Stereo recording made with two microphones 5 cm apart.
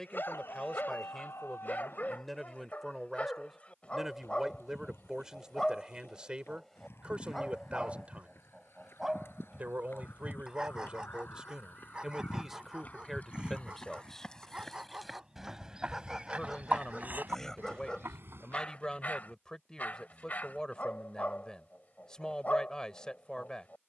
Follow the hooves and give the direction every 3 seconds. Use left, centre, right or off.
off, left, left, left, left, right, right, off.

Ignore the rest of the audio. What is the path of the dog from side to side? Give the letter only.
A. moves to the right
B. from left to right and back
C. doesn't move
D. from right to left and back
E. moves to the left
B.